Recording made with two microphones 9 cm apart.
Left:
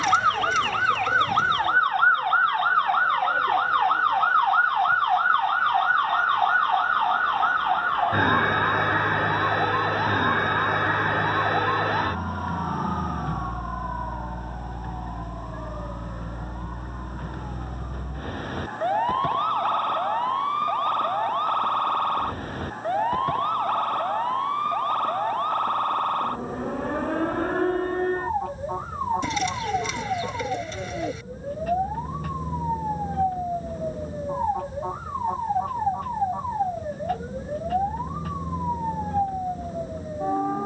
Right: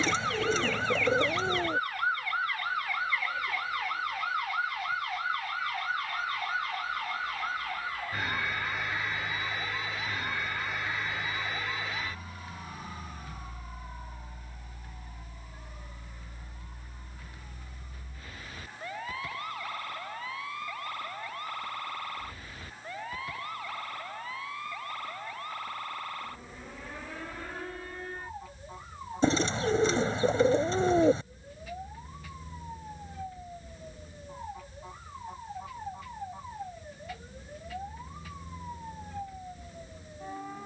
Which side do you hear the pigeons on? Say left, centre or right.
right.